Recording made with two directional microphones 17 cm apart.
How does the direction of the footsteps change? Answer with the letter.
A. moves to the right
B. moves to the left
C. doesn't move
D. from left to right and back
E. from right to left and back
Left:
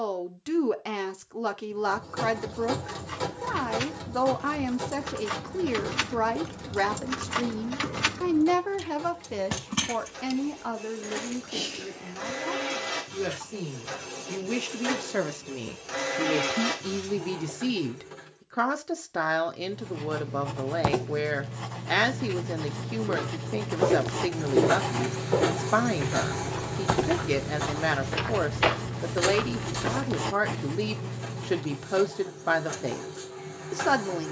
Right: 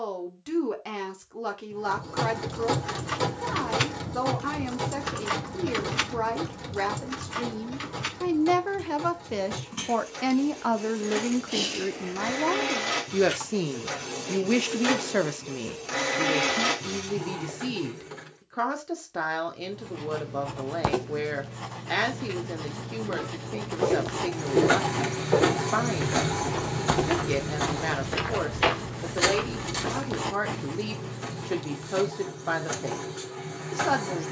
D.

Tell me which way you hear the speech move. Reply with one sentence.
In this clip you hear the speech go right and come back.